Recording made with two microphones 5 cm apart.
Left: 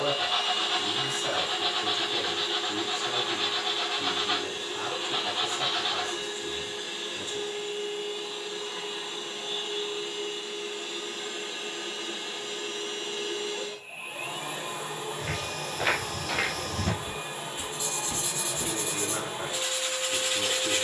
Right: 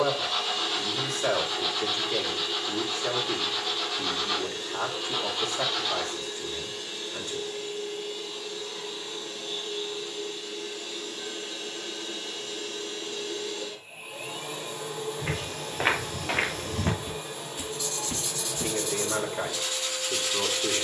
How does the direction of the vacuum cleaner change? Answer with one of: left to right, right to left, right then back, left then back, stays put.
stays put.